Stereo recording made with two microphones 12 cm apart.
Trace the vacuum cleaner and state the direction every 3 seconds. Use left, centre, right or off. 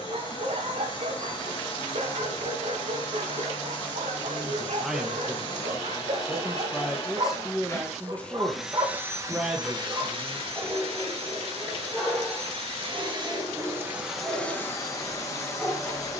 left, left, left, right, right, left.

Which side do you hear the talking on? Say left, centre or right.
centre.